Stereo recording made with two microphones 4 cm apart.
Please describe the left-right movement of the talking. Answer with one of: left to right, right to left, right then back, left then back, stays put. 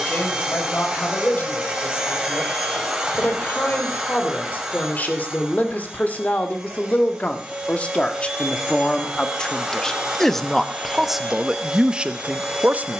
left to right.